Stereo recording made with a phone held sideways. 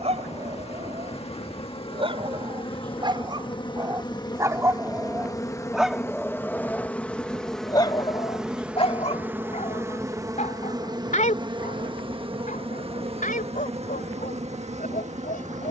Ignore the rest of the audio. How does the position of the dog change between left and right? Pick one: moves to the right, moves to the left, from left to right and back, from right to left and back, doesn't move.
moves to the left.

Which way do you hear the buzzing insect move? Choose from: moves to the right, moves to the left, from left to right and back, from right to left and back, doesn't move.
moves to the right.